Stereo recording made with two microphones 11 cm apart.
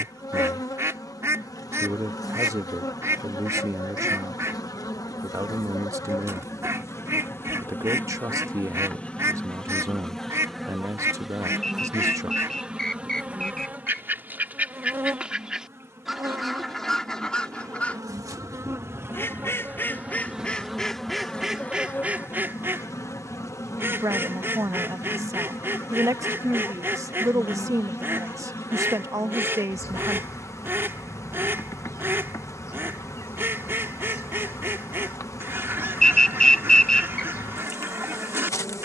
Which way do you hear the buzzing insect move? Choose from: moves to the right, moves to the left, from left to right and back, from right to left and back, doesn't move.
from left to right and back.